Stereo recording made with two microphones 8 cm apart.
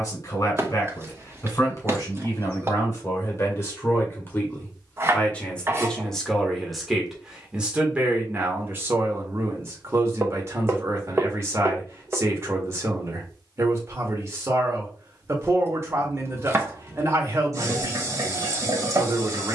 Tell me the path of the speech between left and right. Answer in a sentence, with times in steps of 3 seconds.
You can hear the speech on the left from 0 s, in the centre from 6 s and on the right from 9 s.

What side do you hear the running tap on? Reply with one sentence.
In this clip you hear the running tap on the right.